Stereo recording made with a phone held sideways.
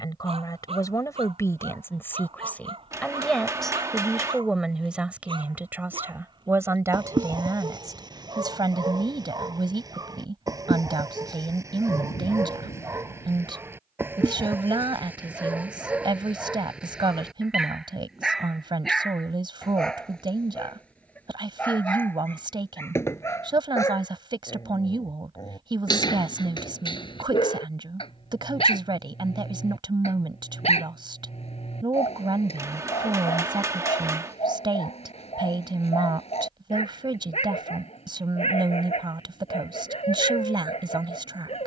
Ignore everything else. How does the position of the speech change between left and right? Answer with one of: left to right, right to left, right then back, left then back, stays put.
left to right.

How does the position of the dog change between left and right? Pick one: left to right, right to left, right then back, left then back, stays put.
right to left.